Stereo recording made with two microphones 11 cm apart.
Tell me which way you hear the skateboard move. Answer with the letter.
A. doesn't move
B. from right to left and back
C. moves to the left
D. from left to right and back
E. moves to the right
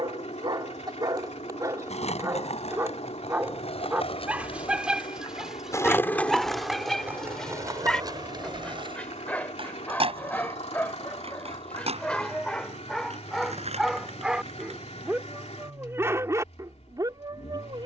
E.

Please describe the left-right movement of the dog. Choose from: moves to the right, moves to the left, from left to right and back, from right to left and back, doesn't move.
from right to left and back.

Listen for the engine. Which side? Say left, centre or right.
left.